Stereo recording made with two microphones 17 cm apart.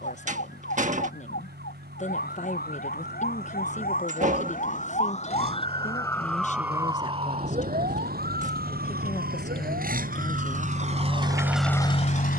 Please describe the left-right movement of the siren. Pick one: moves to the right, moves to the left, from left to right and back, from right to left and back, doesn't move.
moves to the right.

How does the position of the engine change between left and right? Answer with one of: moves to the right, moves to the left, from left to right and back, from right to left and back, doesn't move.
moves to the left.